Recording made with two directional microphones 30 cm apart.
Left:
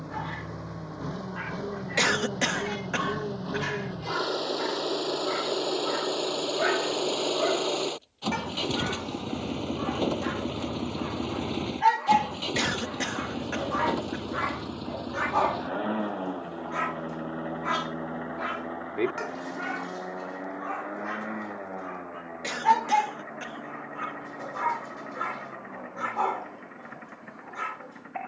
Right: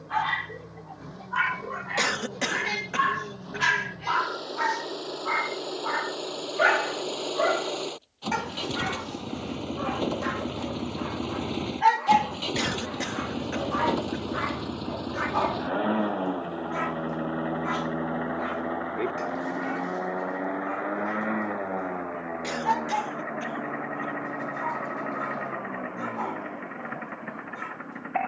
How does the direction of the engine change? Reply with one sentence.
You can hear the engine travel towards the right.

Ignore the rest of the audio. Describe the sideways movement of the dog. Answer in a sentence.
You can hear the dog move from right to left.